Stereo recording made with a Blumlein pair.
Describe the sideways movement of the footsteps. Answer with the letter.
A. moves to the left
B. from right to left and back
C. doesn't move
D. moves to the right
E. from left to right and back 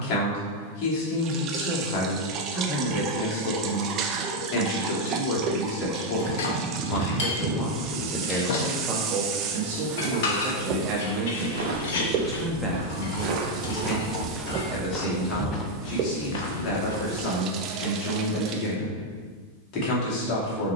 A.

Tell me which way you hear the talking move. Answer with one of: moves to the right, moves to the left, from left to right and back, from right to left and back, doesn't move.
from left to right and back.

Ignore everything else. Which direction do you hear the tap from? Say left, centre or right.
right.